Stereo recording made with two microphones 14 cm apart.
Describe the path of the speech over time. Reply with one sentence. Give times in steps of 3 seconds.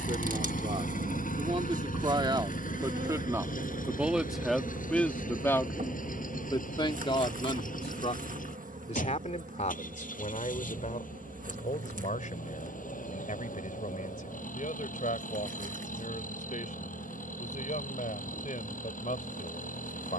In this clip you hear the speech on the right from 0 s, in the centre from 3 s and on the left from 6 s.